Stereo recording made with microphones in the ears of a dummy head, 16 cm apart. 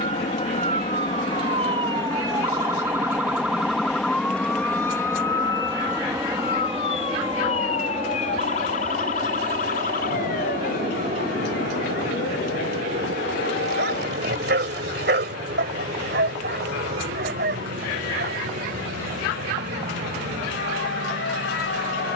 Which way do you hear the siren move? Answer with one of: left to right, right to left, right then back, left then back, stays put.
right to left.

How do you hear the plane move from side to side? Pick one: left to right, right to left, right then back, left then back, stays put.
left to right.